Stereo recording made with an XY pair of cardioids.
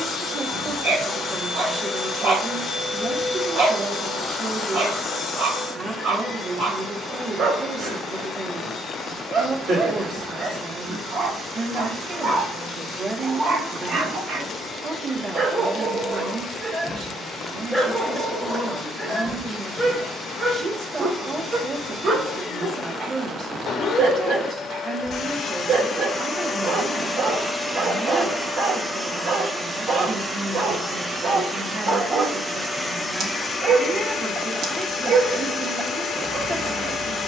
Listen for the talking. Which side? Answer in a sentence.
In this clip you hear the talking on the right.